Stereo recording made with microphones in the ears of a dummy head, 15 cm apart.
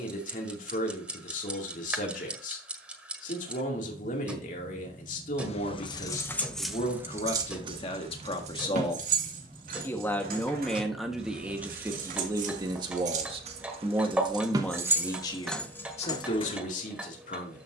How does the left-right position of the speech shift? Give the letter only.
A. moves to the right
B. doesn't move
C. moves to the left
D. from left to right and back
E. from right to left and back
D.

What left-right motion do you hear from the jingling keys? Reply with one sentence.
In this clip you hear the jingling keys go right and come back.